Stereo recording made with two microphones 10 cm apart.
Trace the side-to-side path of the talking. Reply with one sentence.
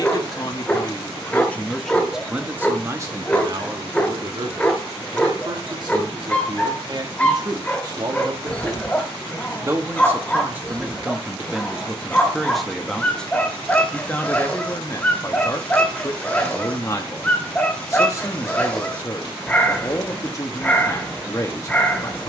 In this clip you hear the talking go right and come back.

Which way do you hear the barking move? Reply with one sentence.
You can hear the barking stay put.